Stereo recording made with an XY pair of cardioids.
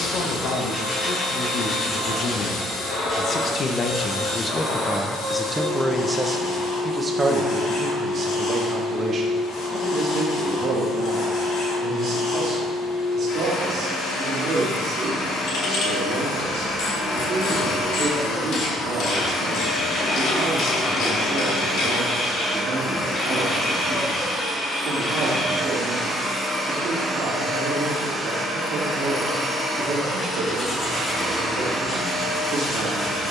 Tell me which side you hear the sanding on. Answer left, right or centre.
left.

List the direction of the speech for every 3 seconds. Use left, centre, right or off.
left, left, right, right, right, right, right, right, right, right, right.